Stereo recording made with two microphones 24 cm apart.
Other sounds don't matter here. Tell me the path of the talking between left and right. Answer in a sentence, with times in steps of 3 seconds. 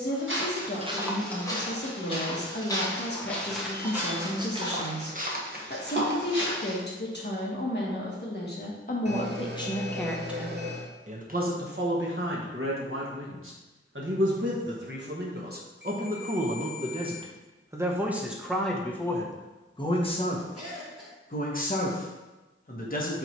In this clip you hear the talking on the left from 0 s, in the centre from 9 s, on the right from 12 s, in the centre from 18 s and on the left from 21 s.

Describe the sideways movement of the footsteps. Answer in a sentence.
In this clip you hear the footsteps go left and come back.